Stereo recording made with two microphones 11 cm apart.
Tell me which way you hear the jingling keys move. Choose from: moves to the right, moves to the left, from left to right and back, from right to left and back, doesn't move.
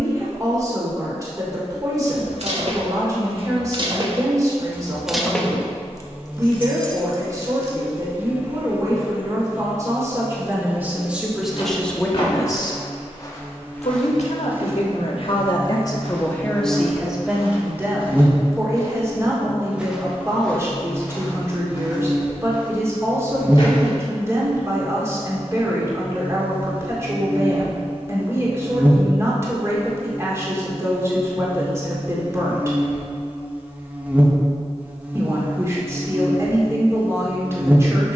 moves to the left.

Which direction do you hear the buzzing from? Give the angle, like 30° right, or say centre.
10° right.